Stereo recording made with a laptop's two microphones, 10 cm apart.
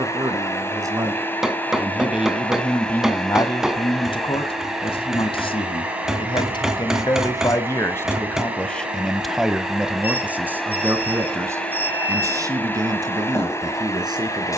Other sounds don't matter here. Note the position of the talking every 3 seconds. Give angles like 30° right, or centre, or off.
20° right, 50° left, 30° left, 10° right, 40° right.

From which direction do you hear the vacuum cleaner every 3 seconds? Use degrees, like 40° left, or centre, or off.
20° left, centre, 20° right, centre, 20° left.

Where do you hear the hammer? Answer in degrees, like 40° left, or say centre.
centre.